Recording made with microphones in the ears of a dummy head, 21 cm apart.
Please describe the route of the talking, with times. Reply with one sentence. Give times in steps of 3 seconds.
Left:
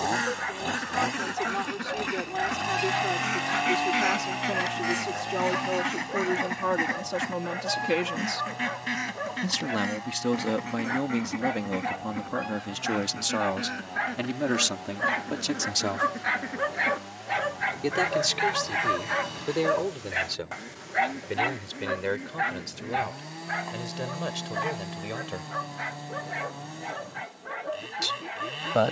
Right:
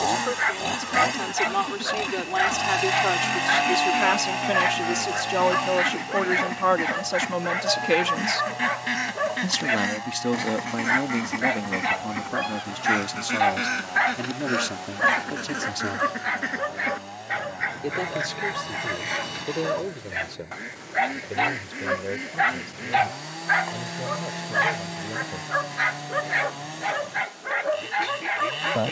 You can hear the talking on the right from 0 s, in the centre from 9 s and on the left from 12 s.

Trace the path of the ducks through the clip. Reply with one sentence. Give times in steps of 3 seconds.
In this clip you hear the ducks on the left from 0 s, in the centre from 6 s and on the right from 9 s.